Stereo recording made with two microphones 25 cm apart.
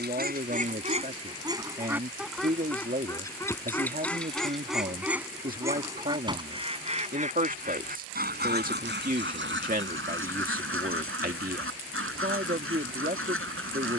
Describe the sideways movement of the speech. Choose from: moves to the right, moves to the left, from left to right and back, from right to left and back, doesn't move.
doesn't move.